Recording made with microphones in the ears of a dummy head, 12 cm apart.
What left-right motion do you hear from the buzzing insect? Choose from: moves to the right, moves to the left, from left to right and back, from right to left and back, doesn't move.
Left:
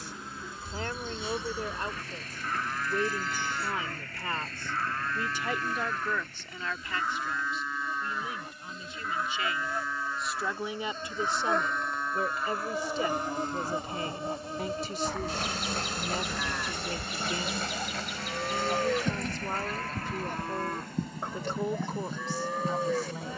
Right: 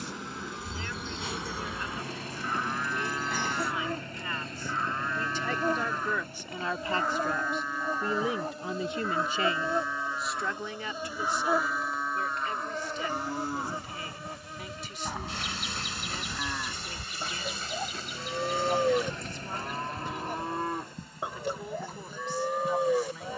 moves to the left.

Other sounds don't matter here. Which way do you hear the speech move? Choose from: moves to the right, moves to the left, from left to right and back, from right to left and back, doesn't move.
from left to right and back.